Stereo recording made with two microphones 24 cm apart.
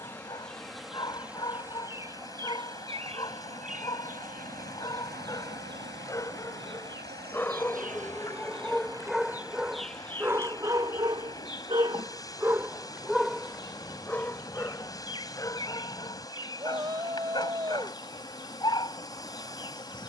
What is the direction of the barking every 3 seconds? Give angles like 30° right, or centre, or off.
20° left, 20° left, 10° left, 10° right, centre, 20° left, 20° left.